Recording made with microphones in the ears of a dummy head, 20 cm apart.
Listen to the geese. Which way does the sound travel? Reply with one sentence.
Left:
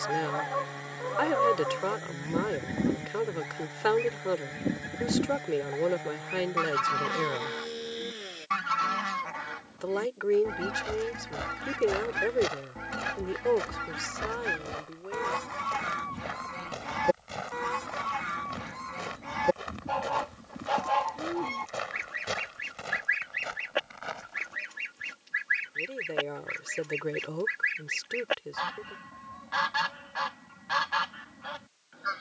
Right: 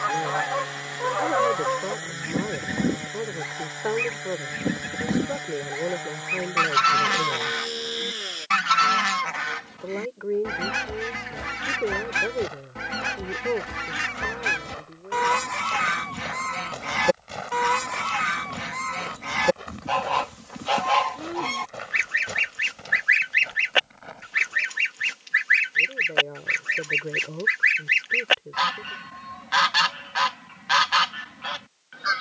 You can hear the geese stay in one place.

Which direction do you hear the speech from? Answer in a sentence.
You can hear the speech on the left.